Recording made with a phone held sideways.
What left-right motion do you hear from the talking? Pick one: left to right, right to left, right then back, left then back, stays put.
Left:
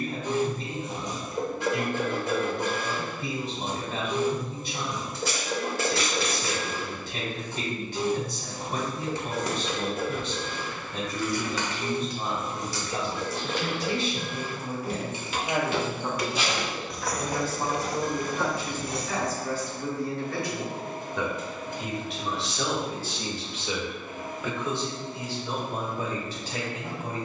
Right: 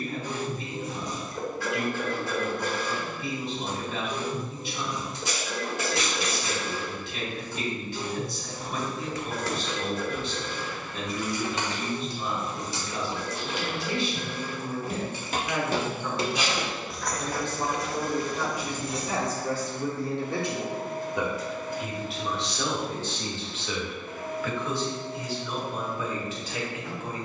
right then back.